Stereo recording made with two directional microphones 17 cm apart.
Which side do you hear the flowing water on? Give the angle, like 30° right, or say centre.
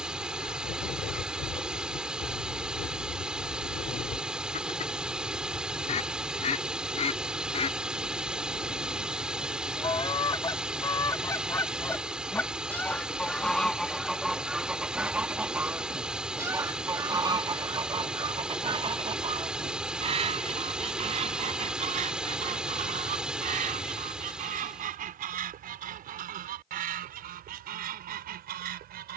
10° right.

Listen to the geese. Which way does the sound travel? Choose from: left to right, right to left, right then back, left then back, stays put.
left to right.